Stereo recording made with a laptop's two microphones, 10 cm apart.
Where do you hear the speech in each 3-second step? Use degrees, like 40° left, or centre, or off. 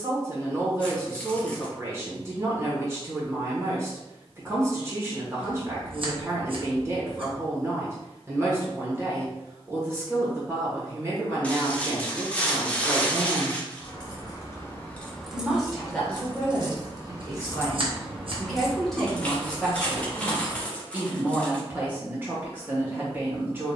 30° right, 30° right, 30° right, 30° right, 30° right, 10° left, centre, 20° right.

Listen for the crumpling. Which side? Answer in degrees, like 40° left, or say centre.
10° left.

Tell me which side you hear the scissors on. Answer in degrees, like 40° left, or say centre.
60° right.